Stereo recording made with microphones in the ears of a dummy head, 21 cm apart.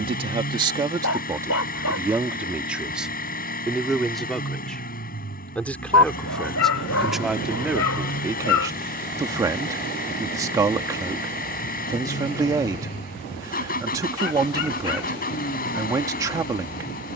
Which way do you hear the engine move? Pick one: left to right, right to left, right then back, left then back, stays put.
stays put.